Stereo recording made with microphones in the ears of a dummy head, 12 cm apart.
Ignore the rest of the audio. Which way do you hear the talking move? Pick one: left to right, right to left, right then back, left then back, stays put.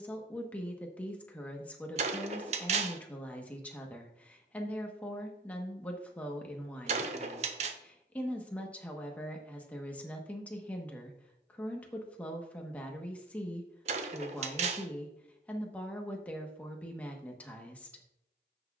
stays put.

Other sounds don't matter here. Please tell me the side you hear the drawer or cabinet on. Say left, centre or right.
right.